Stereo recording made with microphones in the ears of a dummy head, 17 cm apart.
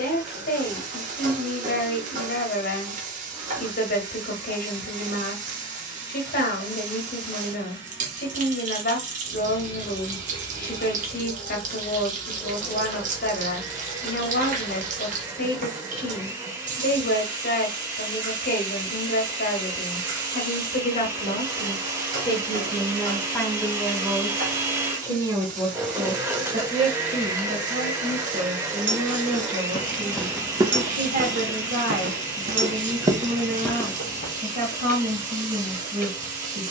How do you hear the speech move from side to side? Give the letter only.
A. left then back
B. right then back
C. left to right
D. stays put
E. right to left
C.